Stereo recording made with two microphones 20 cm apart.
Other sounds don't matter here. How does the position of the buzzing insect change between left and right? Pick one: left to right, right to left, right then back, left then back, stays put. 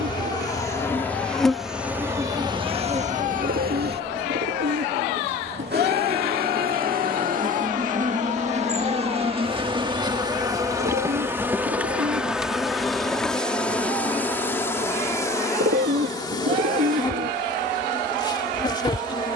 right then back.